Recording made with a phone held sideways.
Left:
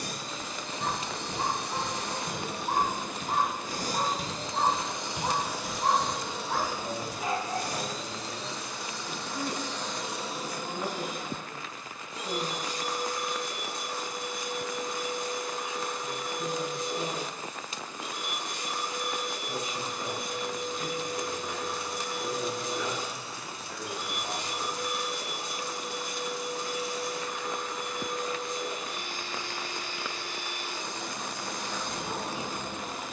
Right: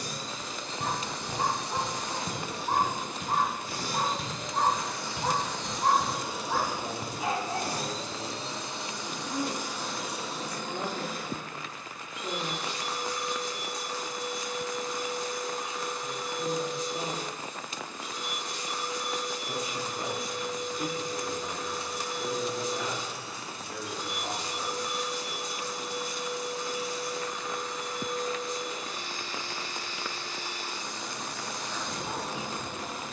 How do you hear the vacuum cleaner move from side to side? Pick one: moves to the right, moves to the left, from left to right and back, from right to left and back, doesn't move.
from left to right and back.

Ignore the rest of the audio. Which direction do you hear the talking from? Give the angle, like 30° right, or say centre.
70° right.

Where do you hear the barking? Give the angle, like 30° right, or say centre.
10° right.